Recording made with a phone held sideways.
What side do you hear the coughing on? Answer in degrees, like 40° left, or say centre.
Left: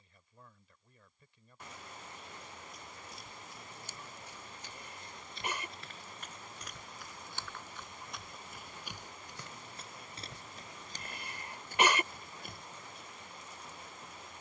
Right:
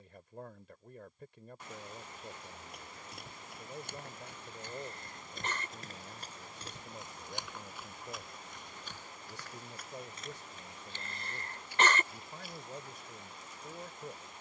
10° left.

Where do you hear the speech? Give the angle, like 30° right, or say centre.
70° right.